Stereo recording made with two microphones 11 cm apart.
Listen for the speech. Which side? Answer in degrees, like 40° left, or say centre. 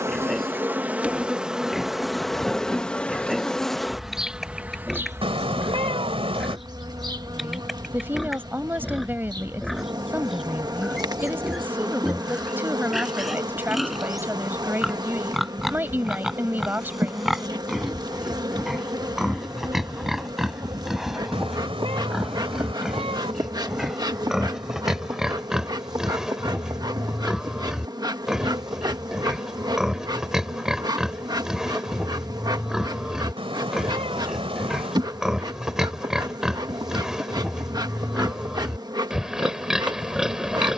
20° right.